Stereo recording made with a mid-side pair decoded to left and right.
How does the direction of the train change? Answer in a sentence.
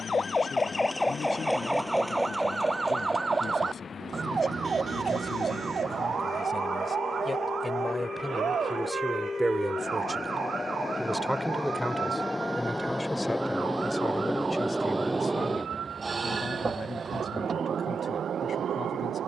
In this clip you hear the train move from left to right.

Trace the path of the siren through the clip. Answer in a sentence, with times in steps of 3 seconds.
You can hear the siren in the centre from 0 s and on the right from 3 s.